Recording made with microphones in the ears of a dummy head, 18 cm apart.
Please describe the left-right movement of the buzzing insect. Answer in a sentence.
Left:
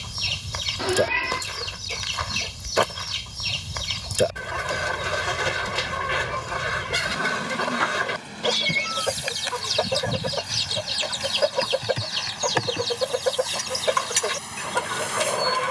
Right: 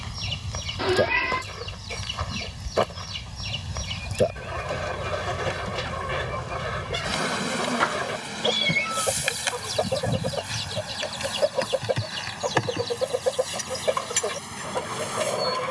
In this clip you hear the buzzing insect move to the left.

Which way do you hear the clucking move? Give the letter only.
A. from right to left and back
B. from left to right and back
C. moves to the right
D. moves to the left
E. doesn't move
E.